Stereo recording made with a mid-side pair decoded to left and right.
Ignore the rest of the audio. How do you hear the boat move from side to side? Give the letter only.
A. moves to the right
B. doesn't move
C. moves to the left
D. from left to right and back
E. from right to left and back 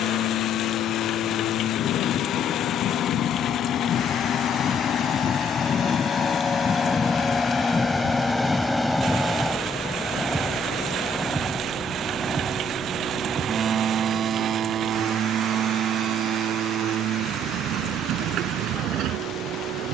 A.